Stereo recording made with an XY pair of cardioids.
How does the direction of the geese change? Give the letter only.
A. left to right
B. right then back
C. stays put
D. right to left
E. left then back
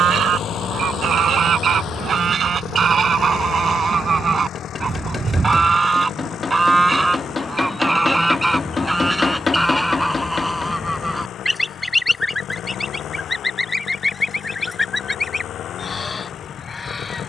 D.